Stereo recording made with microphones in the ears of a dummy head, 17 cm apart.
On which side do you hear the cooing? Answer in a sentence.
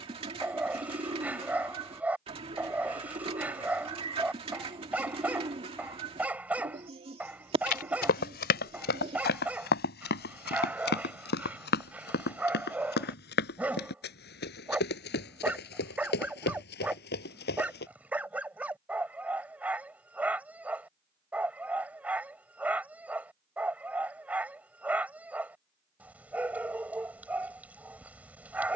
You can hear the cooing on the right.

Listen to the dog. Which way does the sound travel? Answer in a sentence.
You can hear the dog stay put.